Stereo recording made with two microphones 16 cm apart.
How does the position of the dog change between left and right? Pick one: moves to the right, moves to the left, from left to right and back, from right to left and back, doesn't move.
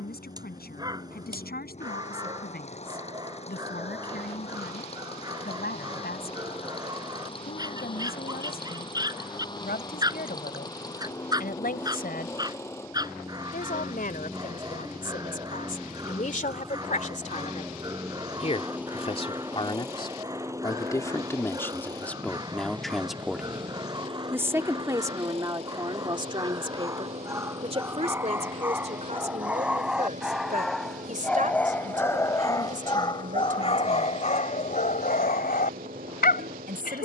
moves to the left.